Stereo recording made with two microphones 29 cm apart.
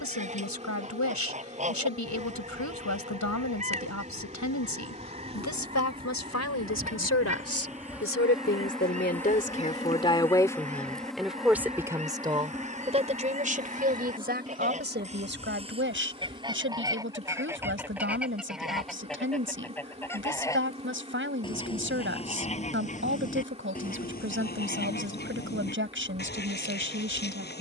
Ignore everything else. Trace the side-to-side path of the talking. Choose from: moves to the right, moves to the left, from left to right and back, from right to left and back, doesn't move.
moves to the right.